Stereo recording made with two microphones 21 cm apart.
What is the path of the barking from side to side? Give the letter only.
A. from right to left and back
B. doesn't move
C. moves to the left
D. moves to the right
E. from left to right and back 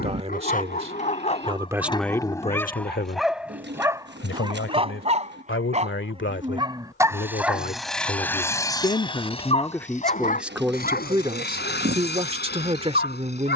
E.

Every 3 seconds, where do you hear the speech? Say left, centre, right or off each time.
centre, left, left, centre, right.